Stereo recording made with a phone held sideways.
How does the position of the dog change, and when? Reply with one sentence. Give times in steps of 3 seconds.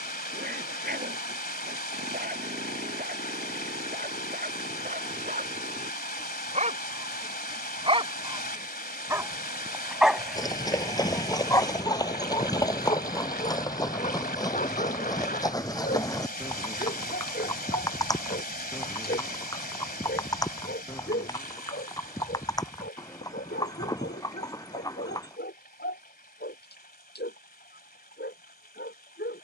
In this clip you hear the dog on the right from 0 s, in the centre from 9 s and on the left from 12 s.